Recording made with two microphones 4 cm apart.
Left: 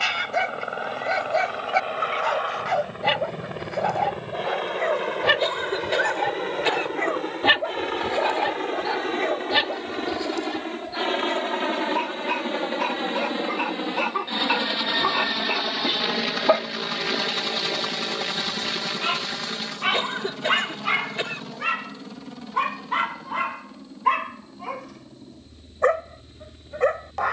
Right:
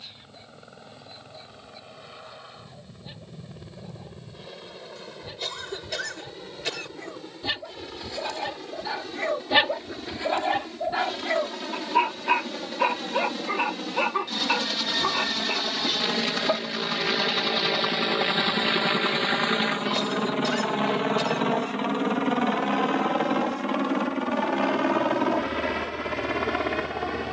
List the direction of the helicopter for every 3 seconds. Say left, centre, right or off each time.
left, left, left, left, left, centre, right, right, right.